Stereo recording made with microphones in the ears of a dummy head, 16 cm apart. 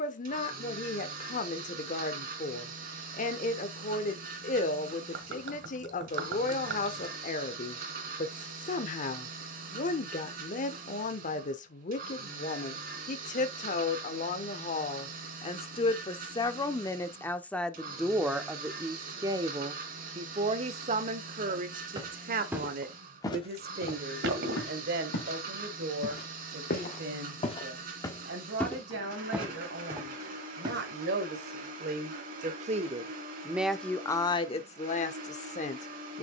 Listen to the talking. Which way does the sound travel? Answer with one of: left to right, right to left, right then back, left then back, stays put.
right then back.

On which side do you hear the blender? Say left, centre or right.
right.